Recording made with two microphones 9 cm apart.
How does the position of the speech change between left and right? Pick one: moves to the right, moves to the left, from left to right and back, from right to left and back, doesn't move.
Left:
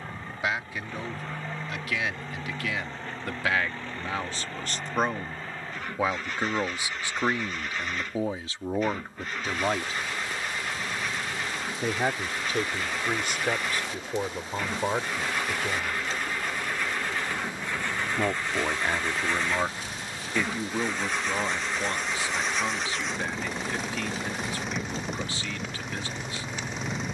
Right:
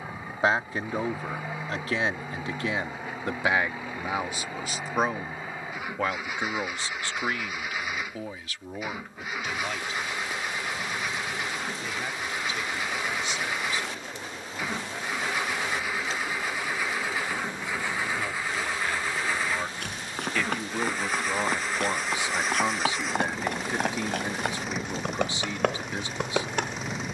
from right to left and back.